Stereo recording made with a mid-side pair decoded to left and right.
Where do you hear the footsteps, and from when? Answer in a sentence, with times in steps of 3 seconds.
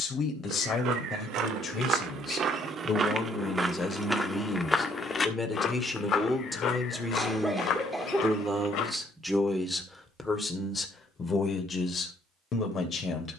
In this clip you hear the footsteps on the right from 0 s, in the centre from 3 s, on the left from 6 s and not at all from 9 s.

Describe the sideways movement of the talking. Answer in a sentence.
In this clip you hear the talking go right and come back.